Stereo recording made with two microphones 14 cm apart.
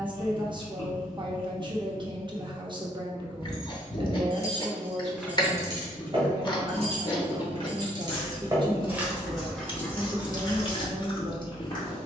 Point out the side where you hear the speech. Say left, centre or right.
right.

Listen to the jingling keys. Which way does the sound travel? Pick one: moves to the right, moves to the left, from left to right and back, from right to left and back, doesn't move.
from left to right and back.